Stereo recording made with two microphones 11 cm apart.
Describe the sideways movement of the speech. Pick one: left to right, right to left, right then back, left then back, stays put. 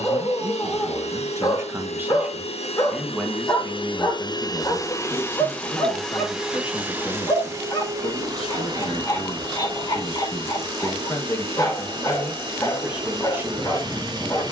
left then back.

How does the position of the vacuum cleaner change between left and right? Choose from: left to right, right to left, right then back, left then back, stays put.
left to right.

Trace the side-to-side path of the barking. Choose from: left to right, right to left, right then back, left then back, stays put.
stays put.